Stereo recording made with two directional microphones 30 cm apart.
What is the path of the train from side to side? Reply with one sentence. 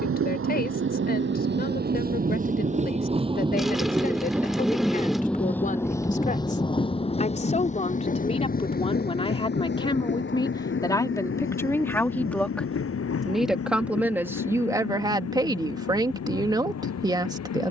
You can hear the train move to the left.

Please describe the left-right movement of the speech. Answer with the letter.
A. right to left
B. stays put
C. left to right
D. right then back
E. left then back
C.